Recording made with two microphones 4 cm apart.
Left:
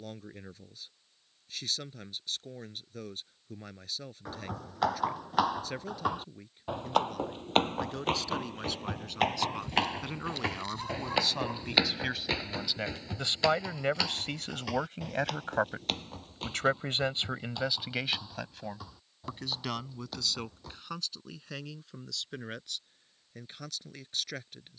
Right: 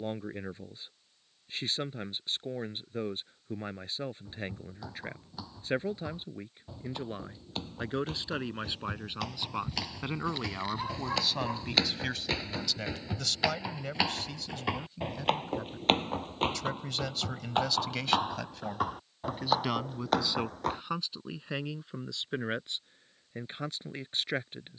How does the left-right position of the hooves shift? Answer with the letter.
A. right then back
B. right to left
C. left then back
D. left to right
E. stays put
D.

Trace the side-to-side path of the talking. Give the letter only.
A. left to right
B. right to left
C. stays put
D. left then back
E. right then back
D.